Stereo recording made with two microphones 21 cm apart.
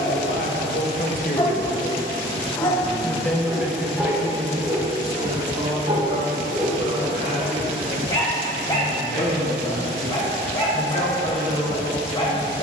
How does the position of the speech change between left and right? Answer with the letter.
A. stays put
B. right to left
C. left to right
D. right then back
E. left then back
C.